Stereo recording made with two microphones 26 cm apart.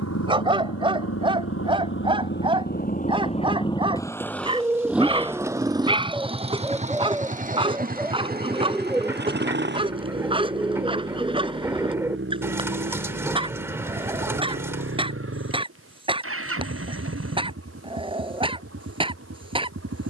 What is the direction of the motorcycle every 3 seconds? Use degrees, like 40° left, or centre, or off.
50° left, centre, 30° right, 40° right, 50° right, 50° right, 50° right.